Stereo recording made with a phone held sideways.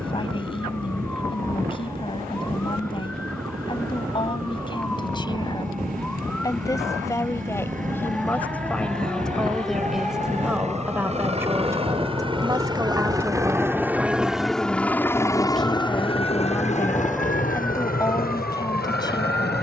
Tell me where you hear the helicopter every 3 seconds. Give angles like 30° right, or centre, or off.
70° right, 70° right, 60° right, 50° right, 20° right, 40° left, 60° left.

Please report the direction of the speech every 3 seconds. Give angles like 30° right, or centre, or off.
30° left, 30° left, 20° left, 10° right, 10° right, 10° left, 20° left.